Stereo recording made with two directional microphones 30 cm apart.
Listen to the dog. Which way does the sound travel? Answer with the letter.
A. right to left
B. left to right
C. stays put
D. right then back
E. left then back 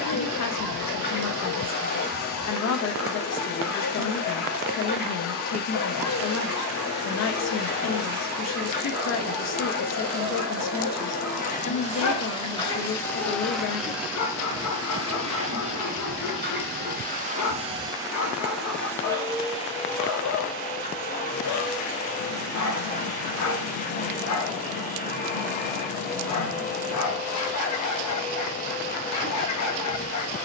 C.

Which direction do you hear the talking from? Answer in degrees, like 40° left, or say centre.
50° left.